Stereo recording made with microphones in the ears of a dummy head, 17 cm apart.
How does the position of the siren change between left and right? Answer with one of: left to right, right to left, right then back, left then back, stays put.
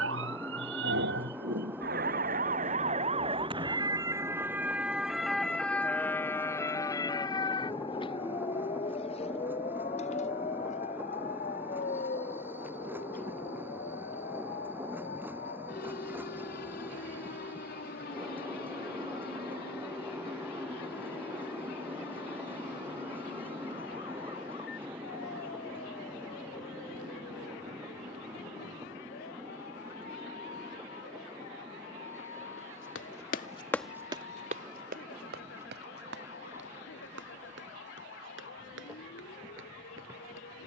right to left.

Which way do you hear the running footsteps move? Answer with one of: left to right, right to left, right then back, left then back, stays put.
left to right.